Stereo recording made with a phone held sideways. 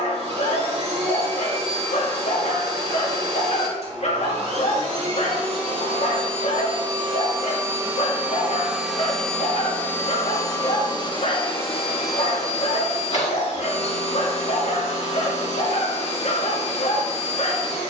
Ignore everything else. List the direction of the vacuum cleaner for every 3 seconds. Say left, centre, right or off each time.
right, right, right, left, left, left.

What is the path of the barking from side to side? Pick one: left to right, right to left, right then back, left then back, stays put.
stays put.